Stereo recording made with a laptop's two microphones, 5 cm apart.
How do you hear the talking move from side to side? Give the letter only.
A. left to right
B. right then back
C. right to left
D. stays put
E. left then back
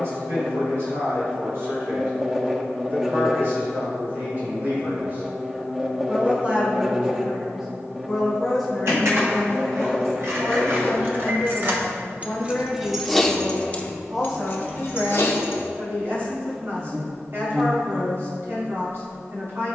E.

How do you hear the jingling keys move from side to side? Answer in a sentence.
In this clip you hear the jingling keys go from the right side to the left.